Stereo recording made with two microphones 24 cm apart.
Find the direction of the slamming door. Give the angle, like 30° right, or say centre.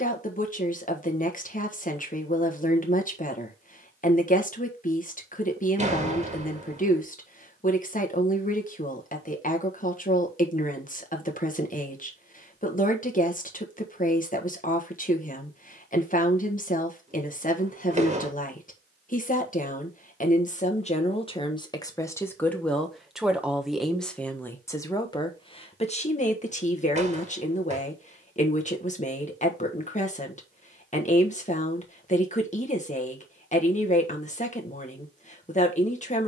30° right.